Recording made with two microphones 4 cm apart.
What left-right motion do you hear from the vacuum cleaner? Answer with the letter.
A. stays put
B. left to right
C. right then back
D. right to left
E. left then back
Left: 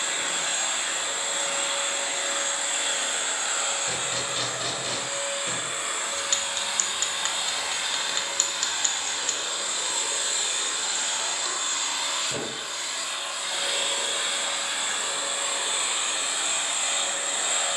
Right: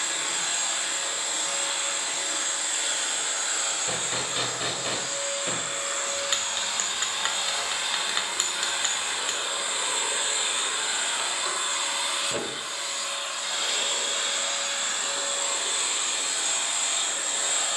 C.